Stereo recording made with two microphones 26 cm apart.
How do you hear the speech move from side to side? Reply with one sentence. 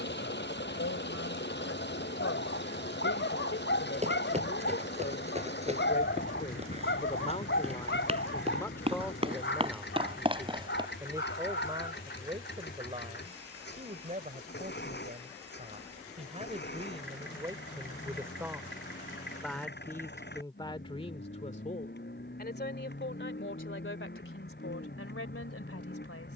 In this clip you hear the speech go right and come back.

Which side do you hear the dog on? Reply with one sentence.
In this clip you hear the dog on the left.